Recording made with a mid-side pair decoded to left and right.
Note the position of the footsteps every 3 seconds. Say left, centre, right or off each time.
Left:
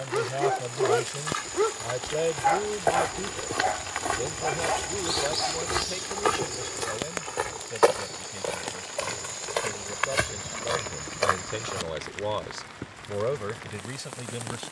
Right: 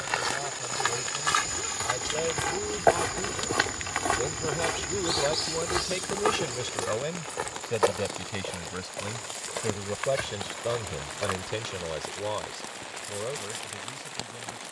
right, centre, left, left, off.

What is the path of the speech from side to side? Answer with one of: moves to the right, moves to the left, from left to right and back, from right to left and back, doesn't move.
from left to right and back.